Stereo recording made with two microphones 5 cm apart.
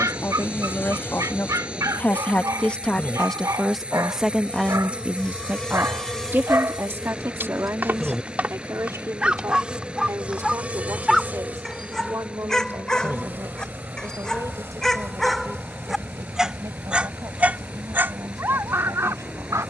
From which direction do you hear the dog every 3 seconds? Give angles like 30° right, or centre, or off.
80° right, 80° right, 40° right, 10° right, 10° left, 10° right, 60° right.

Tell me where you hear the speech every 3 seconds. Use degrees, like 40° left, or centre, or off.
40° left, 10° right, 50° right, 60° right, 70° right, 80° right, 80° right.